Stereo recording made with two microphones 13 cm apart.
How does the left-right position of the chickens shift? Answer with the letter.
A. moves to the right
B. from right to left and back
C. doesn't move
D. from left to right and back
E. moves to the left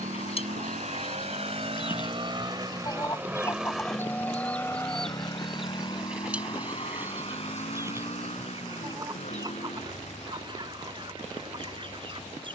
A.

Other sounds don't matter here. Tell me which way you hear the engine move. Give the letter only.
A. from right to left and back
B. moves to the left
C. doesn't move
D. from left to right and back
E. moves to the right
B.